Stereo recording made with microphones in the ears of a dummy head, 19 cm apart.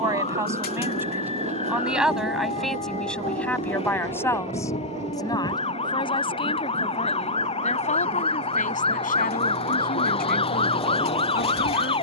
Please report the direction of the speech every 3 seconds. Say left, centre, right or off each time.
centre, centre, left, left.